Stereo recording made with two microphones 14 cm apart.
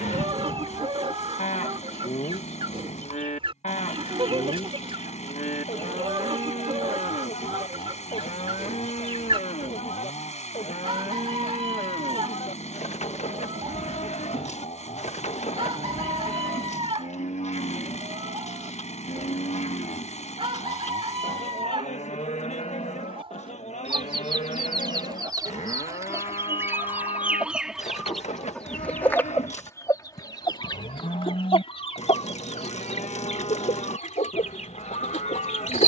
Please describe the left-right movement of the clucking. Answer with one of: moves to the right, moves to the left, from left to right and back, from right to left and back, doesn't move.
moves to the left.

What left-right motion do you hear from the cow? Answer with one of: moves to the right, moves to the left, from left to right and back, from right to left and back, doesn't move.
doesn't move.